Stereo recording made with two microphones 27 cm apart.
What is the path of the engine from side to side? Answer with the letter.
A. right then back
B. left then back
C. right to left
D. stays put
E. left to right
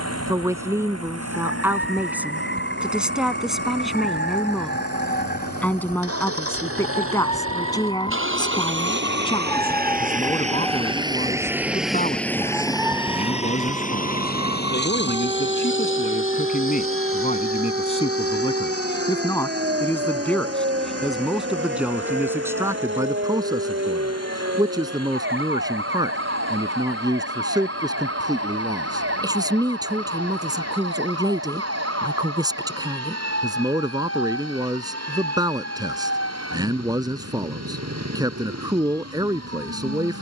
C.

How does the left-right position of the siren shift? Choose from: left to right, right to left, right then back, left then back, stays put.
left to right.